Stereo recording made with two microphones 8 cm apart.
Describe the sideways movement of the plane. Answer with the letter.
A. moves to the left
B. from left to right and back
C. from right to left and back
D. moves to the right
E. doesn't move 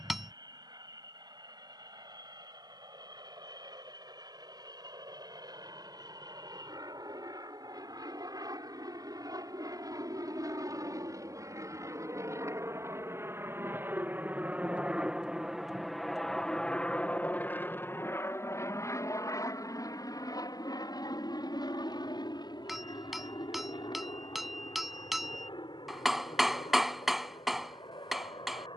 A.